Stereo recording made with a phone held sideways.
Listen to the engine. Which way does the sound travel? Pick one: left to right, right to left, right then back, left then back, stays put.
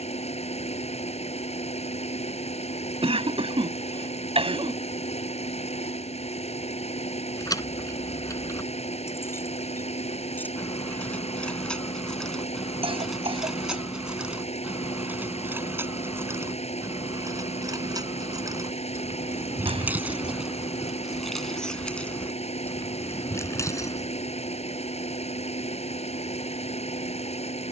stays put.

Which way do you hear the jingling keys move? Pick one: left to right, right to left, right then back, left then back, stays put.
right then back.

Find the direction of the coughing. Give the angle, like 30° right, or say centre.
40° right.